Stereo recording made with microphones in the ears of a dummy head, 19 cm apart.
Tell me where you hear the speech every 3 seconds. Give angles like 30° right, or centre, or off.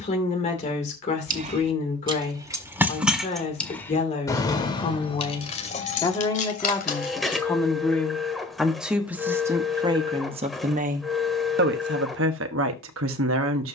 30° left, 30° left, 10° left, 30° right, 60° right.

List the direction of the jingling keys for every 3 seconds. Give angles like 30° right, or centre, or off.
20° right, 20° left, 40° left, off, off.